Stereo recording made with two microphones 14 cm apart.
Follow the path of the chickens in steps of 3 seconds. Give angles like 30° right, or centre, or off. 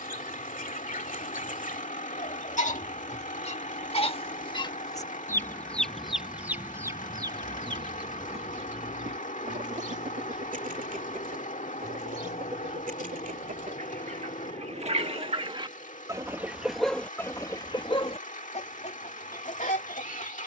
60° left, 30° left, 30° right, 60° right, 60° right, centre, 60° left.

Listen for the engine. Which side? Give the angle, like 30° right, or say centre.
60° left.